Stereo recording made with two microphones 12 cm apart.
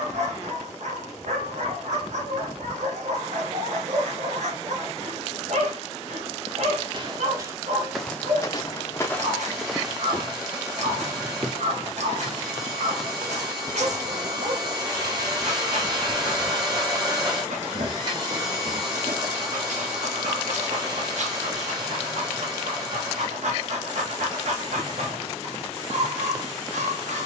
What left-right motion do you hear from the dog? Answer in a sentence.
In this clip you hear the dog stay put.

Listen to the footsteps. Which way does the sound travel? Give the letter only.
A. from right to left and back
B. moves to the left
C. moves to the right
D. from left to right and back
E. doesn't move
A.